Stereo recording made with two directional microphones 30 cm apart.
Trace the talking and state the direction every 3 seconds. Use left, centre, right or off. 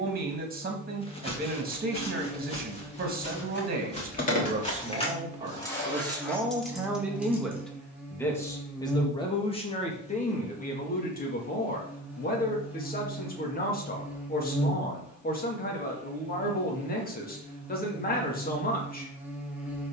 right, right, centre, left, left, left, left.